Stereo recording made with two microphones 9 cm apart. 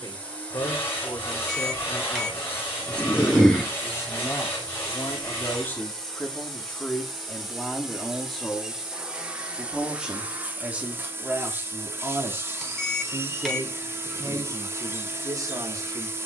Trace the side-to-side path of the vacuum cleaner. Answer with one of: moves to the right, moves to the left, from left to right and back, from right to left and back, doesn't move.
moves to the right.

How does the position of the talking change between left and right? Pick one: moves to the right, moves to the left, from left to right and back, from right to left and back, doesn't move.
moves to the right.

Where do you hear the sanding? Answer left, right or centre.
left.